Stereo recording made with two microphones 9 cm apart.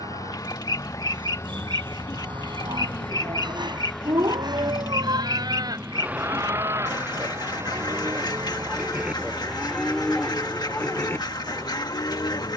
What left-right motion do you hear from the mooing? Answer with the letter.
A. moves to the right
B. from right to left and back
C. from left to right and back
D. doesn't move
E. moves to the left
E.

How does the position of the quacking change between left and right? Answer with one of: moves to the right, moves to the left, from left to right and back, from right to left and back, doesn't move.
doesn't move.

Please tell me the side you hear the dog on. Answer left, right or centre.
right.